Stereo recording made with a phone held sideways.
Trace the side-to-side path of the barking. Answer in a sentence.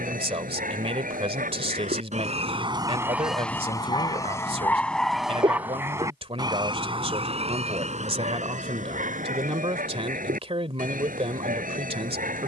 You can hear the barking go left and come back.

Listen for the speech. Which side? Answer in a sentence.
You can hear the speech on the right.